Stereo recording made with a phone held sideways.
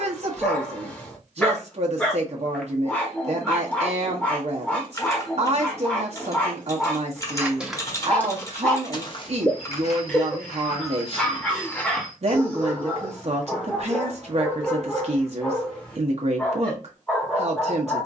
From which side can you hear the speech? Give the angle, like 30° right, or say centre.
50° right.